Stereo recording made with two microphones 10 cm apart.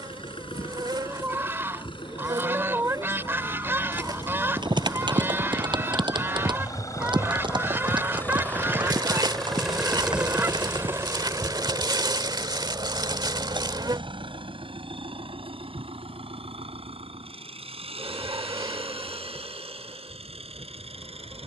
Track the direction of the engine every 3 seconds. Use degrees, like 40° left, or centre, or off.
60° left, 50° left, 30° left, 10° right, 50° right, 70° right, 80° right.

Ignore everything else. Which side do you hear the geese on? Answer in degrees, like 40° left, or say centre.
20° right.